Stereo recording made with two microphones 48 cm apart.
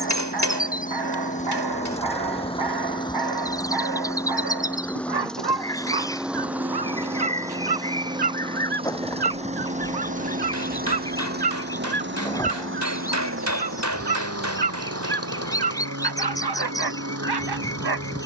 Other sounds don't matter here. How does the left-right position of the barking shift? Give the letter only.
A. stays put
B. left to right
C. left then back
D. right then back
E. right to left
A.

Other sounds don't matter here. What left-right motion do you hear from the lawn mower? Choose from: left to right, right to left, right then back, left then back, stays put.
left to right.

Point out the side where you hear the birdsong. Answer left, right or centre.
centre.